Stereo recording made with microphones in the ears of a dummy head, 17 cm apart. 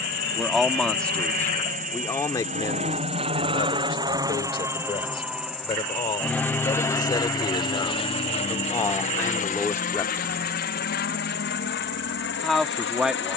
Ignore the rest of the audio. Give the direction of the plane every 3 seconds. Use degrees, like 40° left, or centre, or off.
50° right, 20° right, 20° left, 50° left, 60° left.